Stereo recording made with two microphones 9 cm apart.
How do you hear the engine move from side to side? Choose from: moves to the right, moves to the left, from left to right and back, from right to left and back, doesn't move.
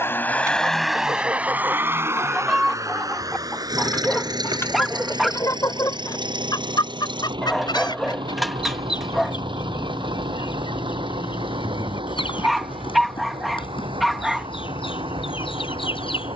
moves to the right.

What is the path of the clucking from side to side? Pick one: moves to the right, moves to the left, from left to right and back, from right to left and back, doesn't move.
moves to the left.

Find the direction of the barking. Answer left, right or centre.
centre.